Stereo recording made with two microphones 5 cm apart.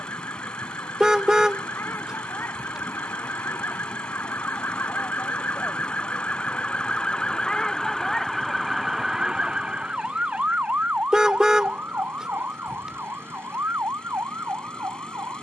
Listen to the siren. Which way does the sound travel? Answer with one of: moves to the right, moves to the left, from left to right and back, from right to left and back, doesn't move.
moves to the right.